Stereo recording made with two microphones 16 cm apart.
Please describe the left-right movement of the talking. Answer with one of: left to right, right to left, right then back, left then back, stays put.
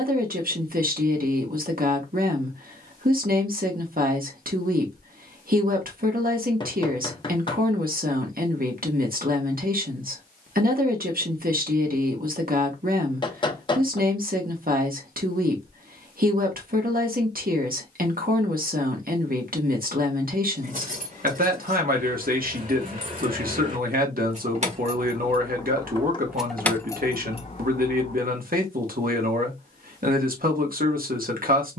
stays put.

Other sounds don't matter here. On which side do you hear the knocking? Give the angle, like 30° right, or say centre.
30° left.